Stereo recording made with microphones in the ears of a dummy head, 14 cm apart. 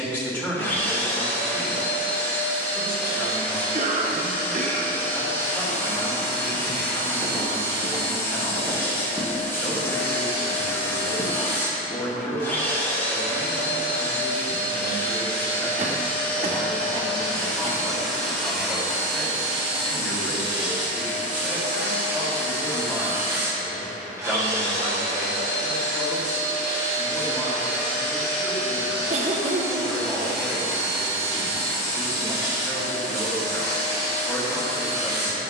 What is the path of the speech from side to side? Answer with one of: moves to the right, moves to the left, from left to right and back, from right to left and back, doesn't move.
doesn't move.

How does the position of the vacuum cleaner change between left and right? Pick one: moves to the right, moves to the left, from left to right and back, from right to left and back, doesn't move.
moves to the right.